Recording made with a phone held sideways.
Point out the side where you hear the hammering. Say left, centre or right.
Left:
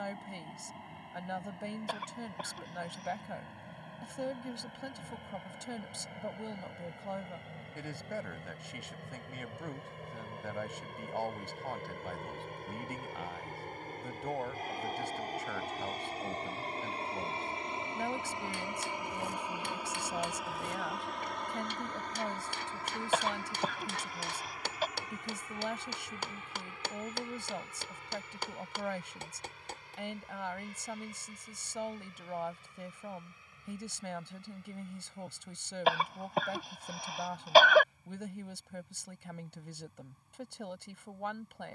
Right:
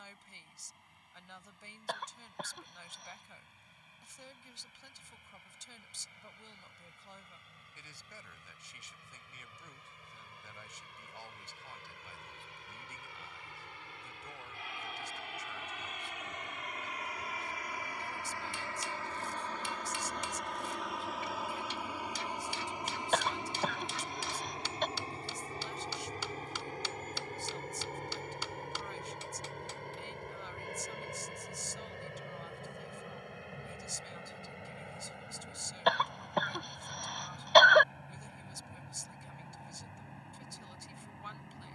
left.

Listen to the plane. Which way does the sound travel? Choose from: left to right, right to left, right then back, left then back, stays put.
left to right.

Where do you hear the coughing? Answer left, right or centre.
centre.